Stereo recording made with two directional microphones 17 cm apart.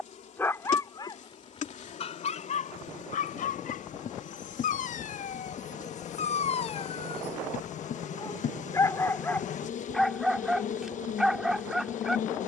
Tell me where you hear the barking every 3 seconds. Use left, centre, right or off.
left, left, left, centre.